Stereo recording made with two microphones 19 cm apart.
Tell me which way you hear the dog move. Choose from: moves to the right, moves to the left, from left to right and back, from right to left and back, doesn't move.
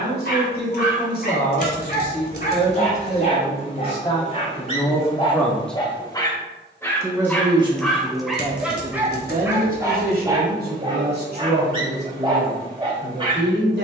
moves to the right.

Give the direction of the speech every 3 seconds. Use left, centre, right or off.
left, left, right, right, right.